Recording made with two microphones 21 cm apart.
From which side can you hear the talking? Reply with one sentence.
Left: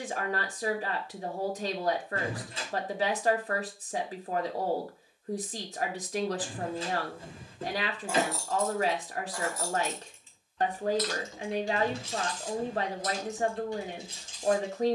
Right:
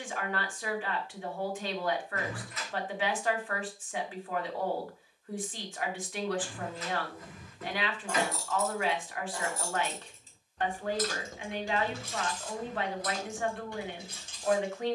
You can hear the talking on the left.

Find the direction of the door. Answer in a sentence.
You can hear the door on the left.